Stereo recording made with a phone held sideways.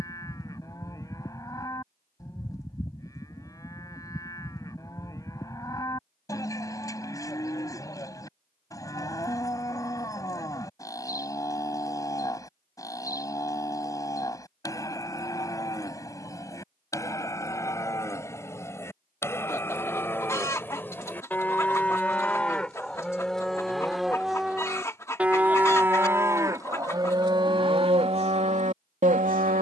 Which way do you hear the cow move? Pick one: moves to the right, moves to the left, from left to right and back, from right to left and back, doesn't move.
moves to the right.